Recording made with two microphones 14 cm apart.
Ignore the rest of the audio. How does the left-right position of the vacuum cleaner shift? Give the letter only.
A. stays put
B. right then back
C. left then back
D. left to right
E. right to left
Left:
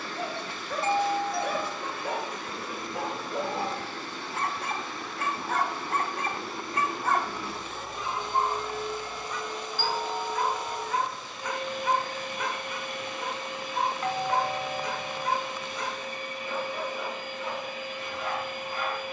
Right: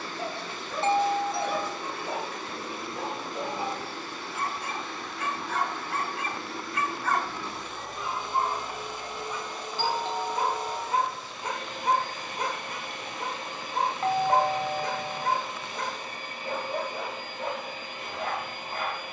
C.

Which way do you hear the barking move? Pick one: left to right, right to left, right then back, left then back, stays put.
left to right.